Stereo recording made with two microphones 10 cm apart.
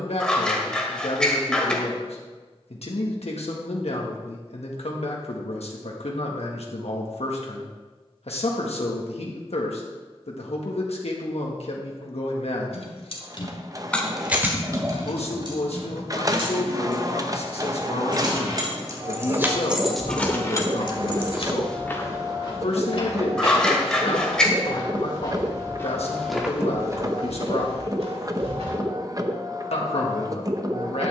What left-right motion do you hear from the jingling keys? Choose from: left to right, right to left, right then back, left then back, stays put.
right then back.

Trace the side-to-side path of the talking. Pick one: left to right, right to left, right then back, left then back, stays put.
stays put.